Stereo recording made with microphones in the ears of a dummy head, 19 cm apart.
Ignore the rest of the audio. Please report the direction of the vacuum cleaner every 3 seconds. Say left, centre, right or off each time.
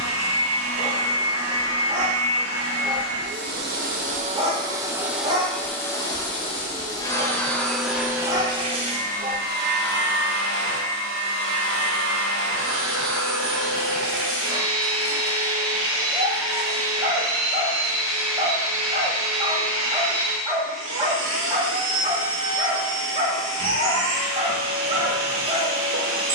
right, right, centre, right, right, right, right, right, right.